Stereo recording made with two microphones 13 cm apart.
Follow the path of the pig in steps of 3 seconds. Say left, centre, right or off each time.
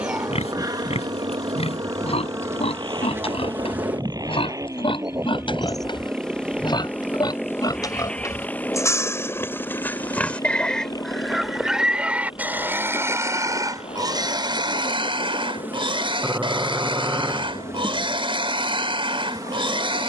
left, left, left, centre, right, right, right.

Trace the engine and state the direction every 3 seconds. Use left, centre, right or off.
right, right, centre, left, left, left, left.